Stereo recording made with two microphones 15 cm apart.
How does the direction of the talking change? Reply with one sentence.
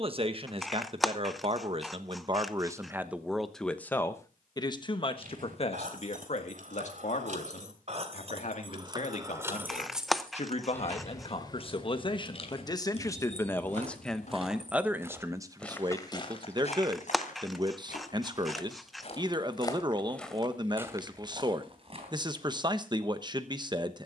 In this clip you hear the talking go left and come back.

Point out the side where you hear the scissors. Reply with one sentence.
In this clip you hear the scissors in the centre.